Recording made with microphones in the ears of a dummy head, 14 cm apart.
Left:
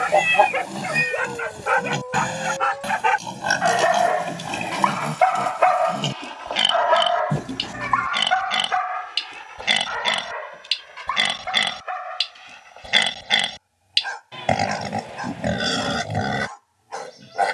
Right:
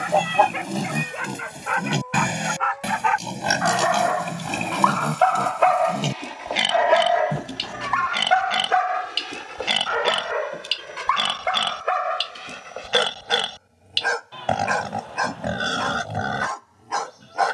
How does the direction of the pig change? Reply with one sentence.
In this clip you hear the pig travel towards the left.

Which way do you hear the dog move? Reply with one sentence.
In this clip you hear the dog move from left to right.